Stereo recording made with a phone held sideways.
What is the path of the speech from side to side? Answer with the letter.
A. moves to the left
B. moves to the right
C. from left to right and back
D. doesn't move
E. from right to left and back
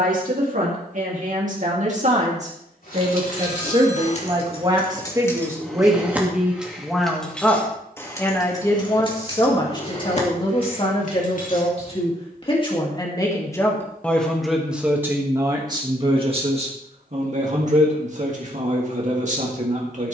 E.